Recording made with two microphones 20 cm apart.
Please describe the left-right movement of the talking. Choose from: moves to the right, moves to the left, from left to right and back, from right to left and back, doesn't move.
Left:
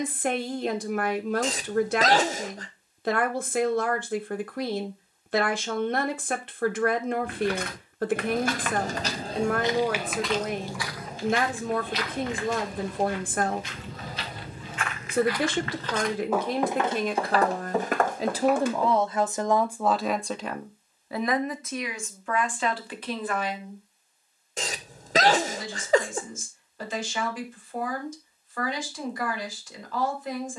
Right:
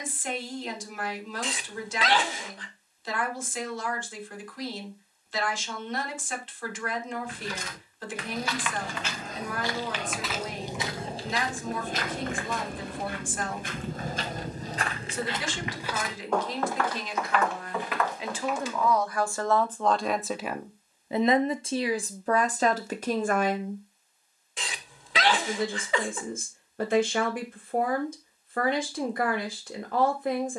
moves to the right.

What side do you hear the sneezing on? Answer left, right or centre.
left.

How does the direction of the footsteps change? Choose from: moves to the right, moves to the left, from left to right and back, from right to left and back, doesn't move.
from left to right and back.